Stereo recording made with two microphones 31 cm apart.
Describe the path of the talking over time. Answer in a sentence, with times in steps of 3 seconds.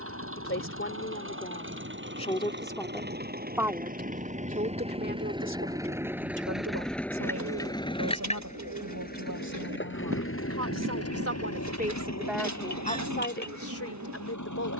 In this clip you hear the talking on the left from 0 s, on the right from 3 s and on the left from 12 s.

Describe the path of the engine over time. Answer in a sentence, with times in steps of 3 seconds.
You can hear the engine on the right from 0 s, in the centre from 6 s and on the left from 9 s.